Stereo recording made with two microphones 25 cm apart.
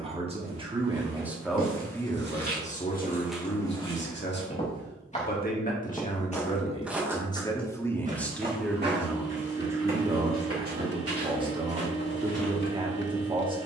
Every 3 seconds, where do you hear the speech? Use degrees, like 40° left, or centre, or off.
centre, 40° left, 10° left, 20° right, 20° right.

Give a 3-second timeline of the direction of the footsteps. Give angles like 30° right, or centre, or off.
50° right, 20° left, 20° right, 60° right, 70° right.